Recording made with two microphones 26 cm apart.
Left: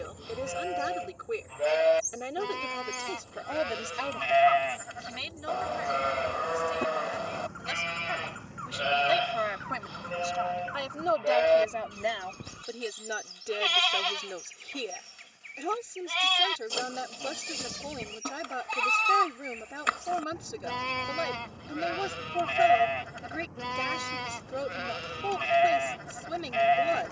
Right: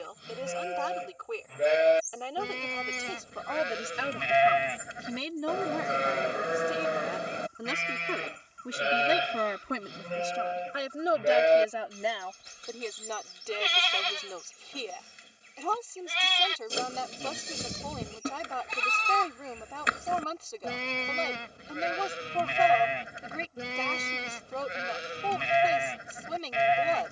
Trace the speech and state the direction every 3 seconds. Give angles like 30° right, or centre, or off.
20° left, 30° right, 70° right, 30° right, 10° left, 20° left, 20° left, 20° left, 20° left.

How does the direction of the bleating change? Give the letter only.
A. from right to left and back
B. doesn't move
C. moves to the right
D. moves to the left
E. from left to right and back
B.